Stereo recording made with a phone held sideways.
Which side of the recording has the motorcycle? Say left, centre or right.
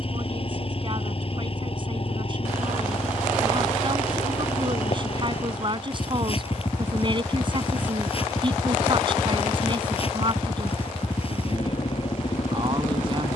left.